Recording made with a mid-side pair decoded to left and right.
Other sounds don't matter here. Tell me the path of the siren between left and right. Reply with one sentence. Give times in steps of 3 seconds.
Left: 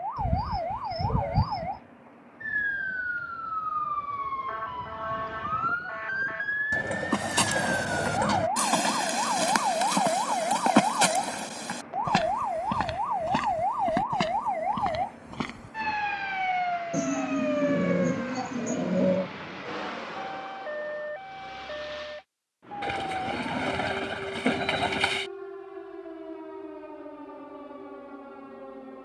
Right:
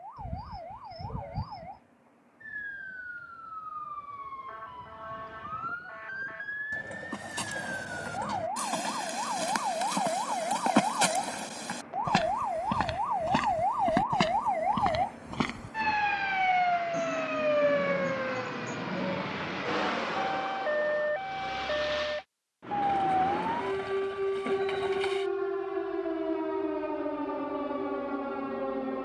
You can hear the siren on the left from 0 s, in the centre from 12 s and on the right from 18 s.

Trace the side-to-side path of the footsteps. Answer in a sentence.
In this clip you hear the footsteps move from left to right.